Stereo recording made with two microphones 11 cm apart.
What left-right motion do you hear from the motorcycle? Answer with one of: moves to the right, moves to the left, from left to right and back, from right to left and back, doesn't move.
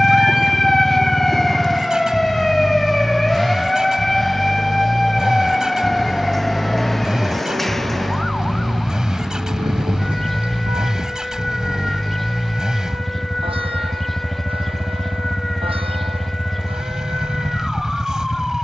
doesn't move.